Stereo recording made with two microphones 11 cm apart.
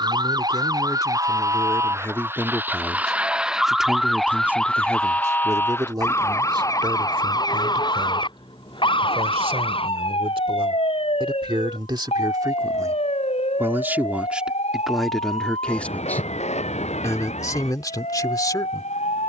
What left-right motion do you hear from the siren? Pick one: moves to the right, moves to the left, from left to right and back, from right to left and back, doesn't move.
moves to the left.